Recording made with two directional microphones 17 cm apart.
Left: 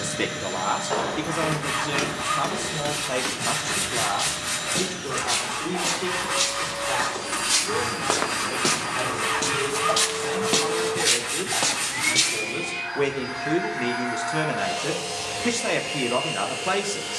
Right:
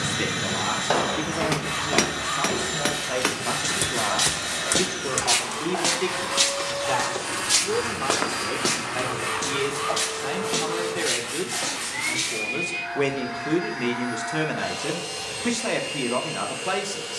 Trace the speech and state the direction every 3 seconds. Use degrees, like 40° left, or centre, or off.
20° left, 10° right, 30° right, 20° right, centre, 10° left.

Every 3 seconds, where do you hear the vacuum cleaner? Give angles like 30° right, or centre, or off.
60° right, 40° right, 20° right, centre, 10° left, 20° left.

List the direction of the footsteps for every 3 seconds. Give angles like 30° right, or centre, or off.
60° right, 50° right, 10° right, 30° left, 50° left, off.